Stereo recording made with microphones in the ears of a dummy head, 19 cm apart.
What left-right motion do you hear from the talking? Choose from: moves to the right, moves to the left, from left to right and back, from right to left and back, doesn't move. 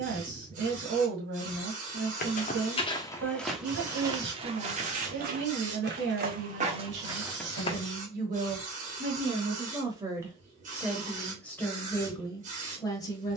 moves to the left.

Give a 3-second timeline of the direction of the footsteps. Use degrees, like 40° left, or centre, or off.
30° left, 20° right, 20° right, off, off.